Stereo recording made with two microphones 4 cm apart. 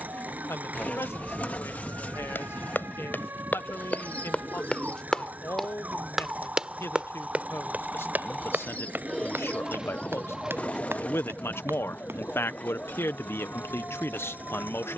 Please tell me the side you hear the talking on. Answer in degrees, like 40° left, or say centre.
70° left.